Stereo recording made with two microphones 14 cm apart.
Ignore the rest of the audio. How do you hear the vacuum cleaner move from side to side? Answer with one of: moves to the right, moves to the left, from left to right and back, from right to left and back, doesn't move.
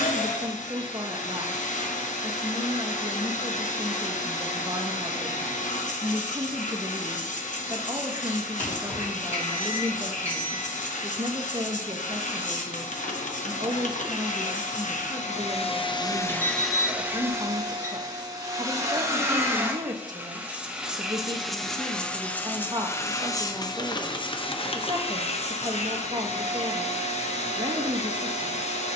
from left to right and back.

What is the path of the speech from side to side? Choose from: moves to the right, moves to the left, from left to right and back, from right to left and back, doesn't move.
doesn't move.